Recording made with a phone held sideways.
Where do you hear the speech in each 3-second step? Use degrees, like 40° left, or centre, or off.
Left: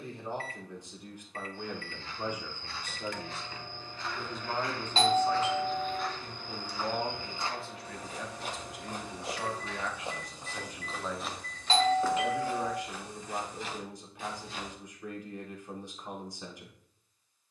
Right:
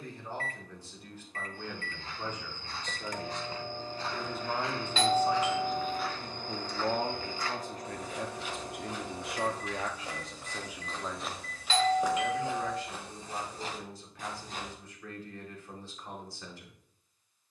20° left, 10° right, 40° right, 30° right, 20° left, 20° left.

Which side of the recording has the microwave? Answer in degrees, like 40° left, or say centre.
40° right.